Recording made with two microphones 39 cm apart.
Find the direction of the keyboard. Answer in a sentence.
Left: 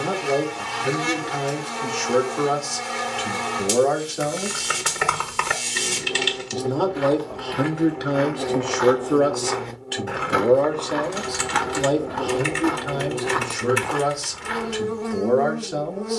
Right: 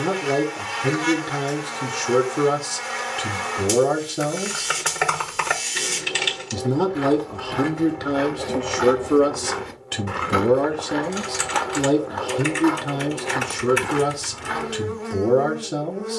In this clip you hear the keyboard in the centre.